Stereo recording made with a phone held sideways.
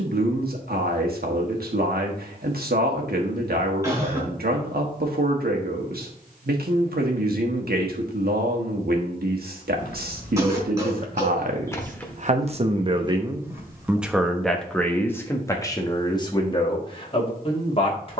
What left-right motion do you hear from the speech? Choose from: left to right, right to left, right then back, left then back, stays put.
right to left.